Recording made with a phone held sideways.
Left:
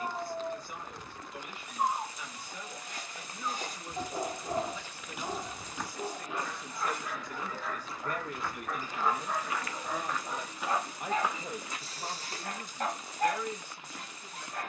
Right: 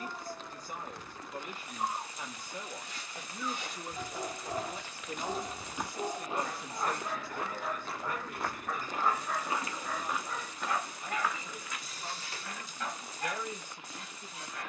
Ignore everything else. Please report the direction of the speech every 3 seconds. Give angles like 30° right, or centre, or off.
40° right, 30° right, 20° left, 60° left, centre.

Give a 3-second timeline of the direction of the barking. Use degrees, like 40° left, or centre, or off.
50° left, 10° left, 20° right, 20° left, 40° left.